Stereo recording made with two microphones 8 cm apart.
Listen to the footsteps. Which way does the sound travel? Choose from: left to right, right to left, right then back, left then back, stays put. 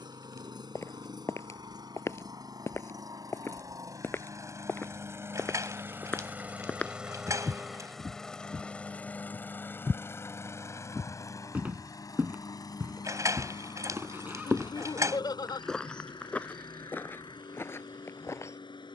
right then back.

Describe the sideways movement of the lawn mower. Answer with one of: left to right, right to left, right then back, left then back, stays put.
right to left.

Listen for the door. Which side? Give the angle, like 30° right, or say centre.
40° right.